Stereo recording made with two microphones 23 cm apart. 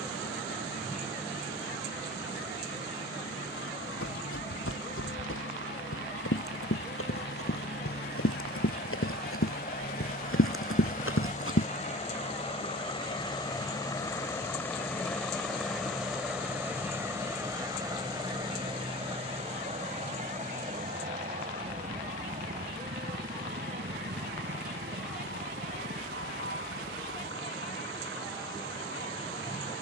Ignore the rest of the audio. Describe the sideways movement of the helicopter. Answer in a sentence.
You can hear the helicopter move to the right.